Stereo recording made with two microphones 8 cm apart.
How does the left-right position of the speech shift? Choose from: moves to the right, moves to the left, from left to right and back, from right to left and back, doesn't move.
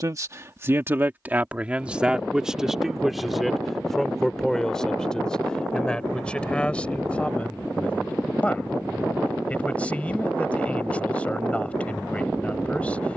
moves to the left.